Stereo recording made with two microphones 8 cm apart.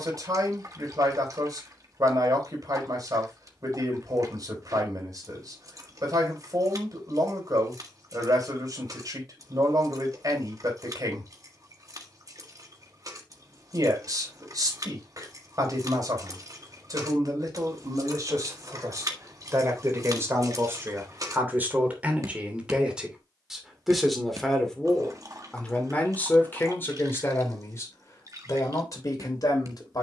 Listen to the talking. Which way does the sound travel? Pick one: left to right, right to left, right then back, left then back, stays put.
right to left.